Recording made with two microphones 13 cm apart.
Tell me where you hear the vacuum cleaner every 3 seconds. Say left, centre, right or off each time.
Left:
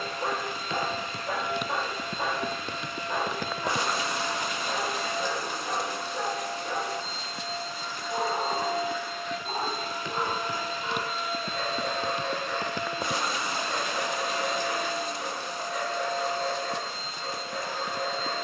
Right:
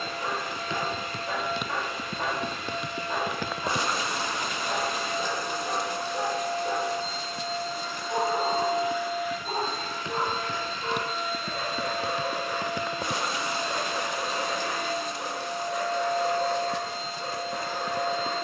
right, right, right, centre, right, right.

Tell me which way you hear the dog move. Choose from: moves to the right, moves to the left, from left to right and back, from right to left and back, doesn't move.
moves to the right.